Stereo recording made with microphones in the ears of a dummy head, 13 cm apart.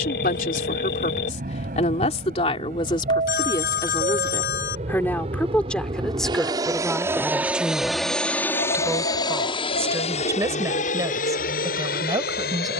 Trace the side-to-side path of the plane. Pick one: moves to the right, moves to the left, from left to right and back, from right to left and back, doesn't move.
moves to the left.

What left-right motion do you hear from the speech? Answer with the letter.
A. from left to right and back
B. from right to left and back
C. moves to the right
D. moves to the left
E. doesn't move
C.